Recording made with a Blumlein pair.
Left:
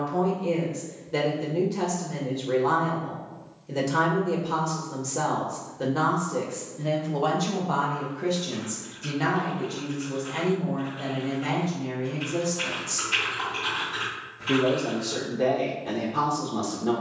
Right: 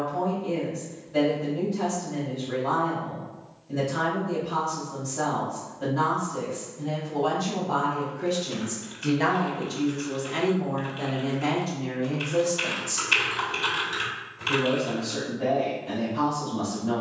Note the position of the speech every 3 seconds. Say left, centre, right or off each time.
left, left, left, right, centre, left.